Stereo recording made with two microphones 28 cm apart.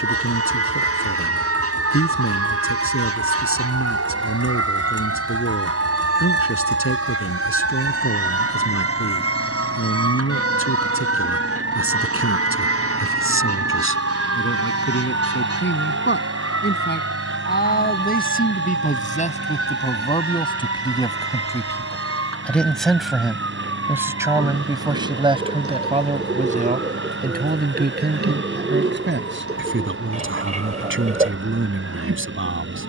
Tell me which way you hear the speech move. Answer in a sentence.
In this clip you hear the speech move from left to right.